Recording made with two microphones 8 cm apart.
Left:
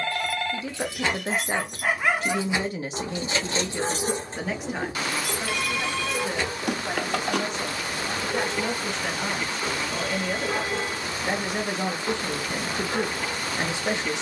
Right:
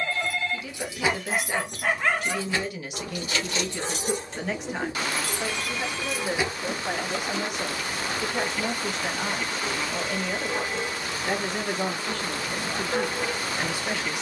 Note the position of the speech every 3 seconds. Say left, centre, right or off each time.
left, centre, centre, centre, left.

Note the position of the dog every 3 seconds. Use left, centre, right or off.
centre, left, left, left, centre.